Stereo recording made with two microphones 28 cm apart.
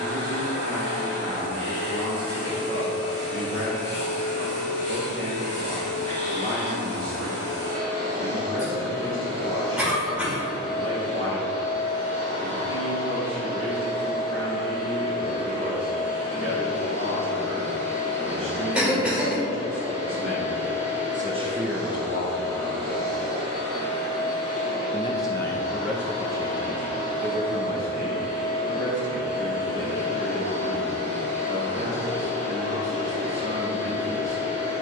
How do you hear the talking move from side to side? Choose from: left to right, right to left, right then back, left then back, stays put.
left then back.